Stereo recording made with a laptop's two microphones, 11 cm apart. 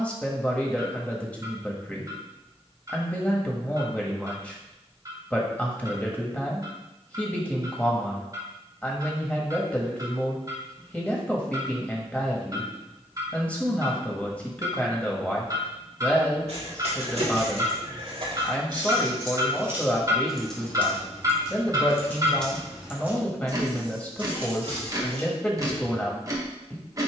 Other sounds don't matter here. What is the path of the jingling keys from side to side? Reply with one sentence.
You can hear the jingling keys move from right to left and back again.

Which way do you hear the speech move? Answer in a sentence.
You can hear the speech stay put.